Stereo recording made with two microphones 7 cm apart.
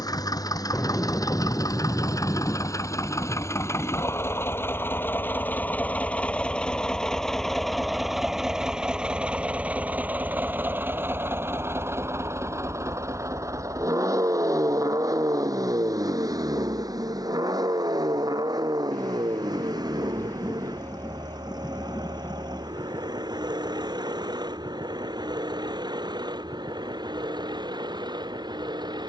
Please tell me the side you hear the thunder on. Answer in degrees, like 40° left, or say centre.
30° left.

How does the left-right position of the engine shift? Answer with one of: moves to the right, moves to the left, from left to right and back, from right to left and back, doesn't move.
moves to the right.